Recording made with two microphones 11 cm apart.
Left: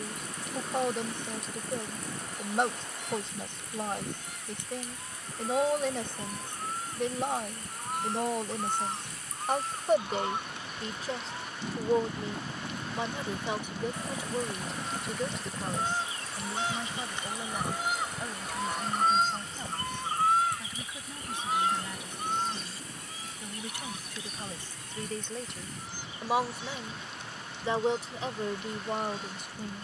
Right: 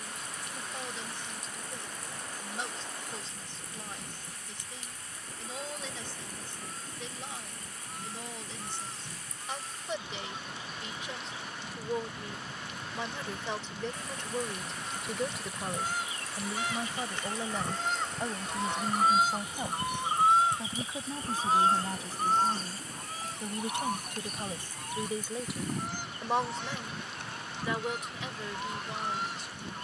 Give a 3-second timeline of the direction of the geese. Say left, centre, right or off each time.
left, left, left, left, left, left, centre, right, right, right.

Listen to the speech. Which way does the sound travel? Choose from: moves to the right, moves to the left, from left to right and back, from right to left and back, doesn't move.
from left to right and back.